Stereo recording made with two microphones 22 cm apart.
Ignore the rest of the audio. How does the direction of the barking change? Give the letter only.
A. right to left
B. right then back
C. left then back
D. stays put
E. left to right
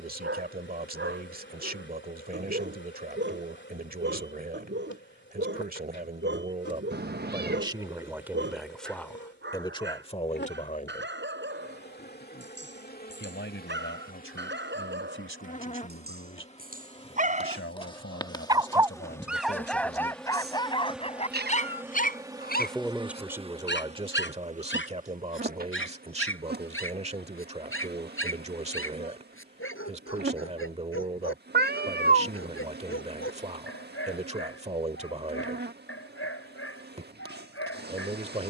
A.